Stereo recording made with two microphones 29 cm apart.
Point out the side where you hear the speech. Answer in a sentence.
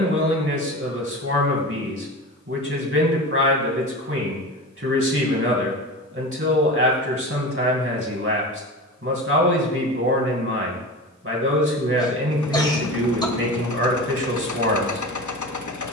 You can hear the speech on the right.